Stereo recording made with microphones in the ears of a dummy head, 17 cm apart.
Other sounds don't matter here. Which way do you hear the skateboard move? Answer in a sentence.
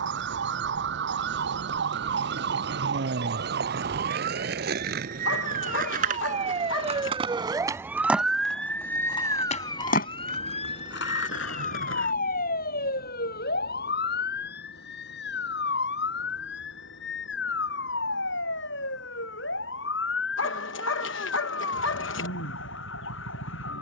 You can hear the skateboard go from the right side to the left.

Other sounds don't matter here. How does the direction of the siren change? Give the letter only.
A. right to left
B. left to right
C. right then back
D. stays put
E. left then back
A.